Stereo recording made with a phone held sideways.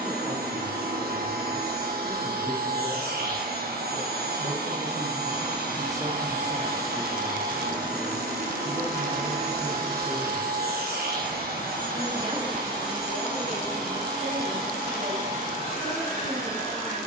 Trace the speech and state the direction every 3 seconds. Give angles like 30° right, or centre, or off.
80° right, 50° right, centre, centre, 50° right, 80° right.